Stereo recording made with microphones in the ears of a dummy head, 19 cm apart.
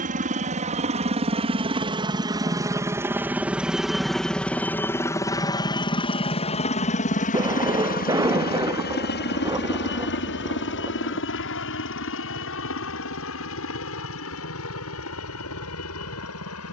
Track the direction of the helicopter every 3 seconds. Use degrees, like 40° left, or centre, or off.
30° right, 10° left, 40° left, 60° left, 70° left, 70° left.